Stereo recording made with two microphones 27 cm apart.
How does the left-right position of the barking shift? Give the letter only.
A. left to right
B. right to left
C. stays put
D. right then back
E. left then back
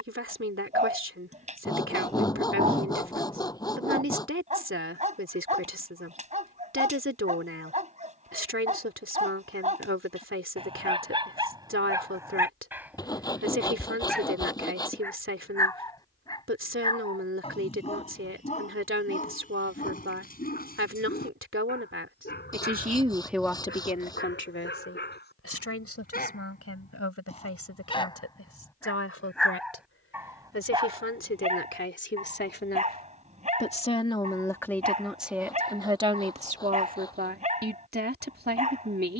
E.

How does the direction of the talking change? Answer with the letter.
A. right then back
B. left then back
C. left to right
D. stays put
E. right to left
B.